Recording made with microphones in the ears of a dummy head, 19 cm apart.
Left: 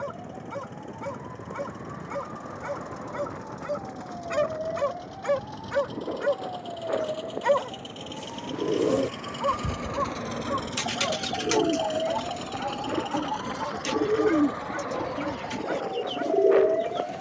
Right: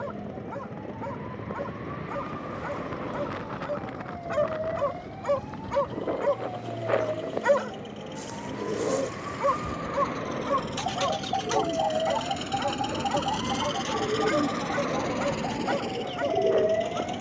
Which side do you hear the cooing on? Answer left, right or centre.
left.